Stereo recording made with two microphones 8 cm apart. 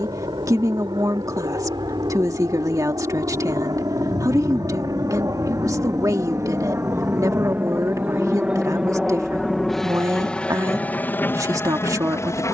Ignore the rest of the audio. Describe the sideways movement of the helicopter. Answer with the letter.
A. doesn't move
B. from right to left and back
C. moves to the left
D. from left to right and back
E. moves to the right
C.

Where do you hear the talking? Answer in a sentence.
In this clip you hear the talking on the right.